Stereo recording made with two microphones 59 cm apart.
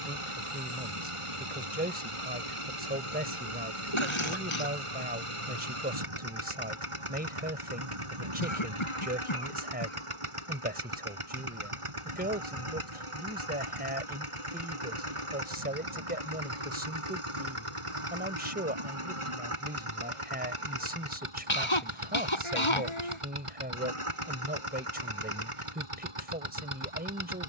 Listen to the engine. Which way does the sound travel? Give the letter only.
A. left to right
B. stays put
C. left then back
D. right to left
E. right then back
B.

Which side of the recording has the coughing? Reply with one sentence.
In this clip you hear the coughing on the left.